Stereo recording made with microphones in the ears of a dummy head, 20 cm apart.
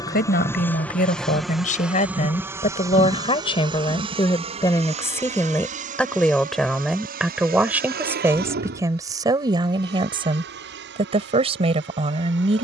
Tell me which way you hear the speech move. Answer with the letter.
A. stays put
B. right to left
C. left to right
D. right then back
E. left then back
C.